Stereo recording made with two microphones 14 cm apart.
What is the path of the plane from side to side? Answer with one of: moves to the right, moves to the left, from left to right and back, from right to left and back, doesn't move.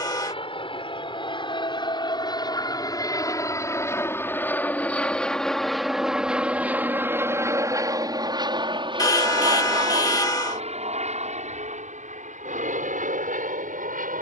moves to the right.